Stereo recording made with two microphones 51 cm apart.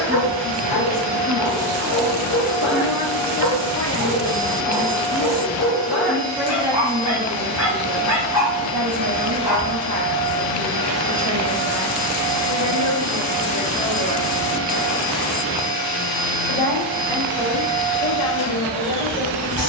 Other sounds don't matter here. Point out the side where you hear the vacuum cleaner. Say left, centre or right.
left.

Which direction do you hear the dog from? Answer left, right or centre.
left.